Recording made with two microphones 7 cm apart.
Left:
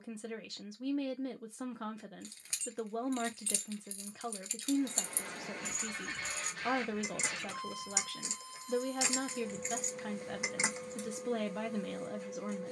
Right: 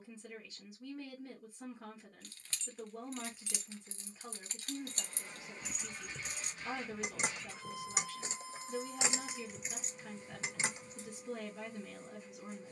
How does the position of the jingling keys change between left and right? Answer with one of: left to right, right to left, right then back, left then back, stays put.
right then back.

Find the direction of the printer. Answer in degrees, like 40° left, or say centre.
70° left.